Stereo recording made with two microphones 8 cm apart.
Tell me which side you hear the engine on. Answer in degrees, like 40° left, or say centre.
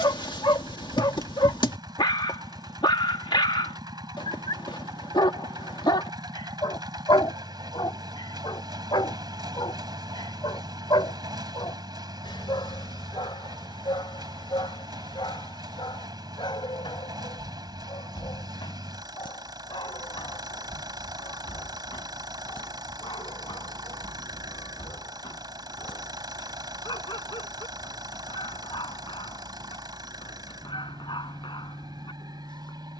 60° right.